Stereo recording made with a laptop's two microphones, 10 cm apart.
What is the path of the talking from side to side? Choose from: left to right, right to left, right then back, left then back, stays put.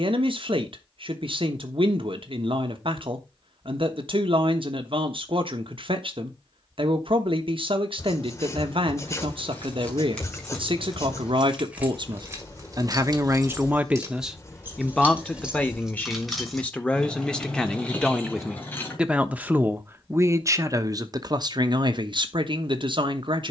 left then back.